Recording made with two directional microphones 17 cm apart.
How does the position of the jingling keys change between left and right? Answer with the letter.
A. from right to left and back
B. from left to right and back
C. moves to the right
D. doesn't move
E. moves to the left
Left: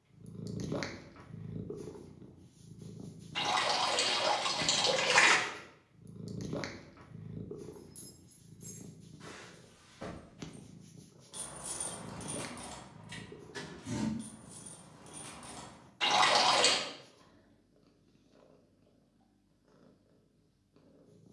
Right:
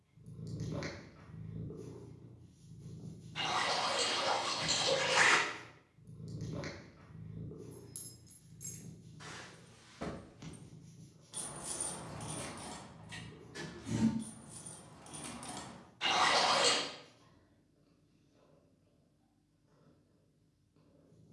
A.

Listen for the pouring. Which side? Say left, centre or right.
left.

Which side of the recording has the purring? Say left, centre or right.
left.